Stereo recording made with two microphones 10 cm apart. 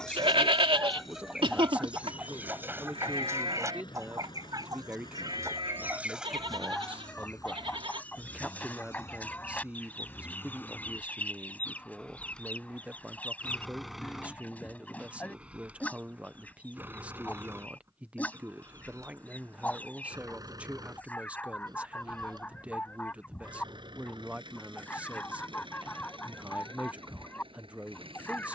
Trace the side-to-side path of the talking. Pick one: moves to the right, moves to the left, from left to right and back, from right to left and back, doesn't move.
doesn't move.